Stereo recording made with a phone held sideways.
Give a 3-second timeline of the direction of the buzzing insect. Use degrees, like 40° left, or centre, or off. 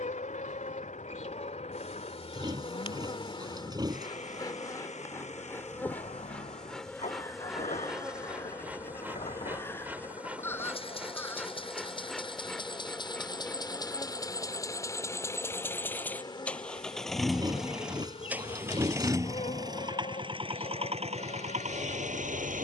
40° left, 20° left, centre, 10° right, 10° left, 30° left, 40° left, 50° left.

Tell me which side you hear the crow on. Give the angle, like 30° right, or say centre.
10° left.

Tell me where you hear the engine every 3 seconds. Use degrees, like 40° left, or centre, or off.
50° left, 50° left, 40° left, 40° left, 30° left, 10° left, 20° right, 50° right.